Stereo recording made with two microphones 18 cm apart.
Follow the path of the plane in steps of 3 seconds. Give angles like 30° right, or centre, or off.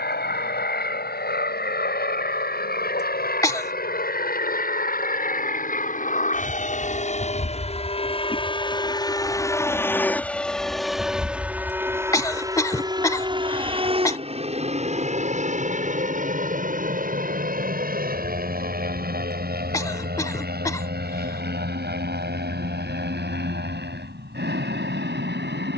70° left, 60° left, 40° left, centre, 30° right, 40° right, 50° right, 60° right, 60° right.